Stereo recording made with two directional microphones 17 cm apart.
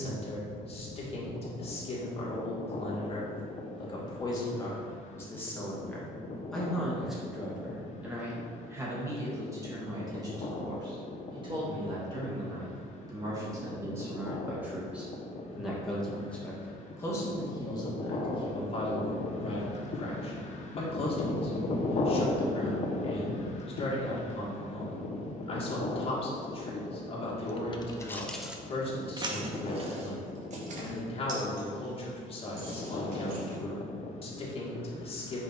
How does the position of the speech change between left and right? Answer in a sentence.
You can hear the speech move from left to right and back again.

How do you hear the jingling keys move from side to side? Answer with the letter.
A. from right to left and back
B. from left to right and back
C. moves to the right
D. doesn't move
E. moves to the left
C.